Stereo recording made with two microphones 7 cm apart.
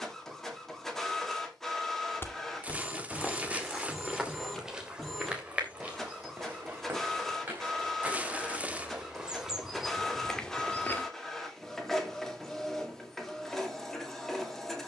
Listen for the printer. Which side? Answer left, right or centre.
centre.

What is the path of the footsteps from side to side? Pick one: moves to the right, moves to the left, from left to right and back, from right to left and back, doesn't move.
from left to right and back.